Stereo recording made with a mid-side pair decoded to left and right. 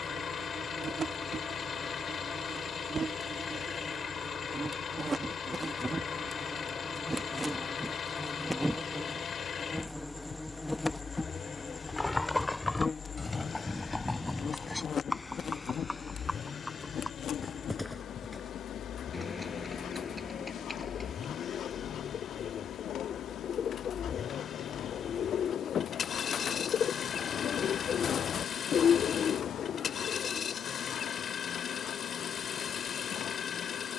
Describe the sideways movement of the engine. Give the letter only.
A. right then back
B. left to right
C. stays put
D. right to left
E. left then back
C.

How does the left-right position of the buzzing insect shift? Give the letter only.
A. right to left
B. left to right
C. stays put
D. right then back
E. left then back
A.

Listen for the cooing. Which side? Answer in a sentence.
You can hear the cooing on the left.